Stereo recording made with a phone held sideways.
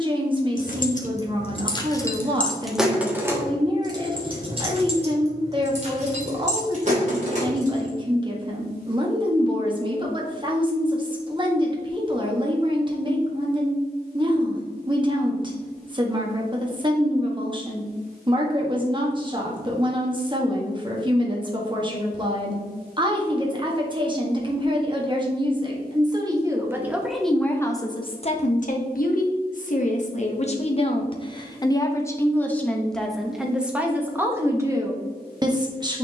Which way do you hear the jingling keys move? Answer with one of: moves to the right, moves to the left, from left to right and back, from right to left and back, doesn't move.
moves to the right.